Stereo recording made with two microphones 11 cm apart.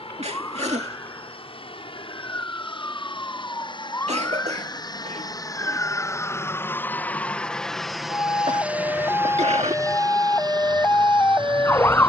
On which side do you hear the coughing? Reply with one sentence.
You can hear the coughing on the right.